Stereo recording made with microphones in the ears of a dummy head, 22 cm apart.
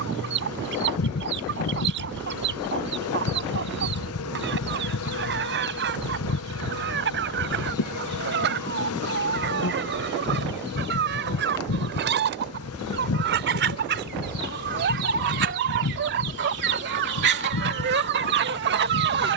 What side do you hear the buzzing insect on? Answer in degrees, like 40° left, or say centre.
70° left.